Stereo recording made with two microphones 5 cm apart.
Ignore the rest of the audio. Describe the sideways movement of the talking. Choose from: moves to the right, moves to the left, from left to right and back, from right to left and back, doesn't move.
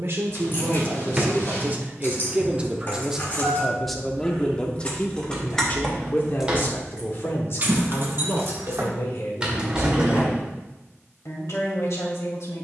moves to the left.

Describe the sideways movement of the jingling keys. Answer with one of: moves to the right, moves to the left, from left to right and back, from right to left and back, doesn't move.
moves to the right.